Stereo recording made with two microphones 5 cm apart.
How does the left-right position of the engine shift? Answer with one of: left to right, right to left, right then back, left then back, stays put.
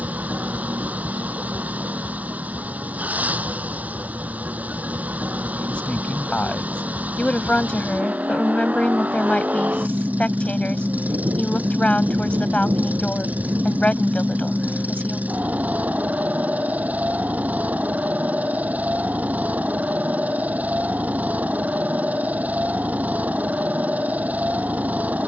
stays put.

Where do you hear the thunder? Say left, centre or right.
right.